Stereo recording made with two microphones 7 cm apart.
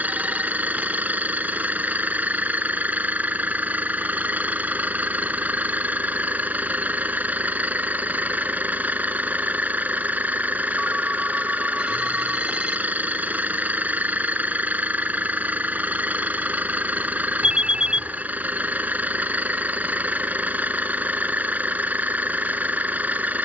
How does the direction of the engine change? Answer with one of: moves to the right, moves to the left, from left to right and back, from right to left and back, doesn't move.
doesn't move.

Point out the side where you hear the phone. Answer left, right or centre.
centre.